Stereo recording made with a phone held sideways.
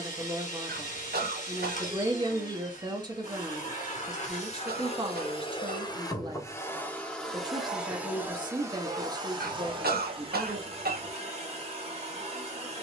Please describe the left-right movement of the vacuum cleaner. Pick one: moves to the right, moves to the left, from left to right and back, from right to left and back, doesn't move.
moves to the right.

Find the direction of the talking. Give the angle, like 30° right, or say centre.
30° right.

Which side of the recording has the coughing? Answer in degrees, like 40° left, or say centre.
80° right.